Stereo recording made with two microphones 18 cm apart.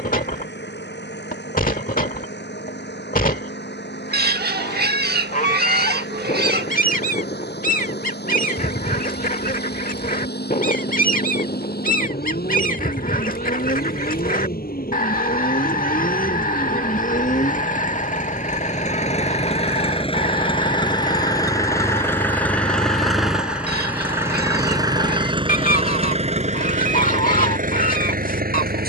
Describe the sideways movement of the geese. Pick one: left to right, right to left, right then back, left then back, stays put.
stays put.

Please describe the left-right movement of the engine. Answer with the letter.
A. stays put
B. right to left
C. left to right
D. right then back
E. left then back
C.